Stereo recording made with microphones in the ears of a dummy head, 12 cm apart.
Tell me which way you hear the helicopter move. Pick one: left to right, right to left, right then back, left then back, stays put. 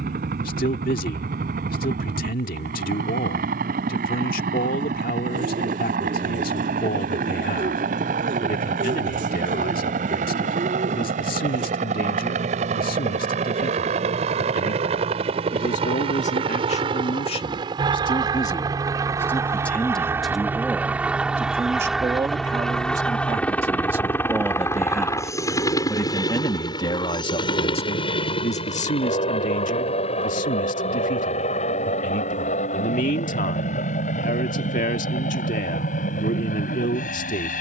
right to left.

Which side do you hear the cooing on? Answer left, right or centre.
right.